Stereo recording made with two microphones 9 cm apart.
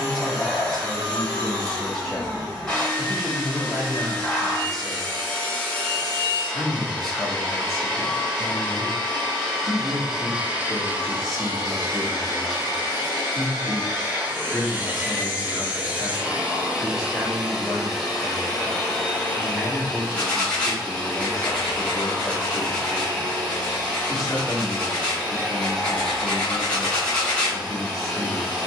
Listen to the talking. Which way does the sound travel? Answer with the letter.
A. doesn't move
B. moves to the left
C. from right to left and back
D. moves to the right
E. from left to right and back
A.